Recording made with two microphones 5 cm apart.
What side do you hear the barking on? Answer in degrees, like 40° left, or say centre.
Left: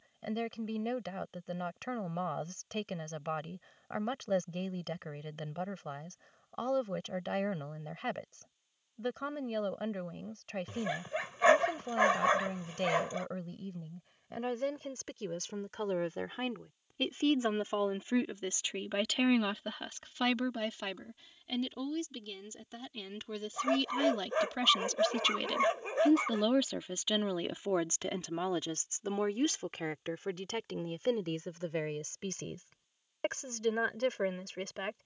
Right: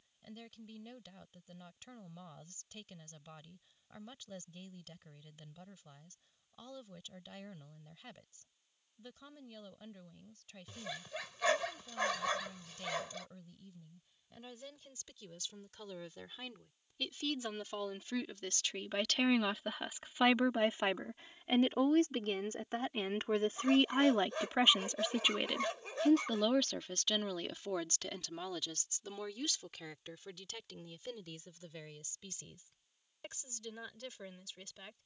30° left.